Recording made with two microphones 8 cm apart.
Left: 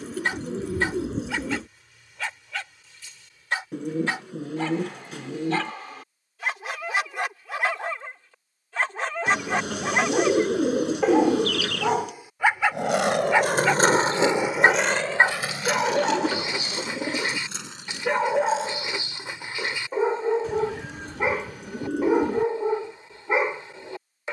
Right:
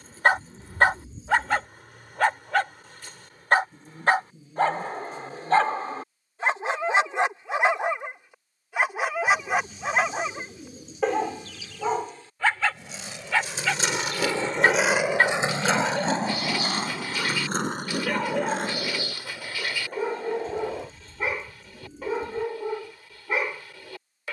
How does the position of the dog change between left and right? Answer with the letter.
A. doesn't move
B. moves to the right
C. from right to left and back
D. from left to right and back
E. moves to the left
E.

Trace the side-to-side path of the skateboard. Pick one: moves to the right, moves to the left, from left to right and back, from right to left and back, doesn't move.
moves to the right.